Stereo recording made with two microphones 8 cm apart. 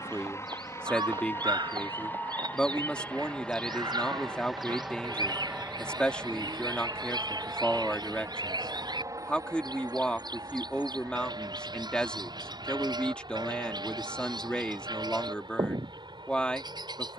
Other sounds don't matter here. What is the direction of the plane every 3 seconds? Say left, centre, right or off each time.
left, centre, right, right, right, right.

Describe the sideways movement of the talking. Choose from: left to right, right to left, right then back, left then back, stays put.
stays put.